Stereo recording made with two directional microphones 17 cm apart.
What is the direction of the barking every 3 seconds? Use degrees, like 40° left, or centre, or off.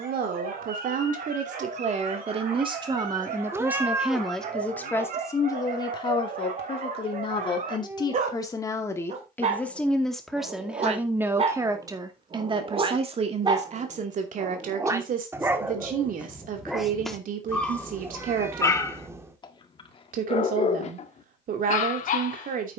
60° right, 50° right, 50° right, 40° right, 30° right, centre, 30° left, 50° left.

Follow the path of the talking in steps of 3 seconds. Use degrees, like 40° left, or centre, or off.
40° right, centre, 30° left, centre, 40° right, 50° right, 50° right, 50° right.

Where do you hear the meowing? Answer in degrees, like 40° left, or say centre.
10° right.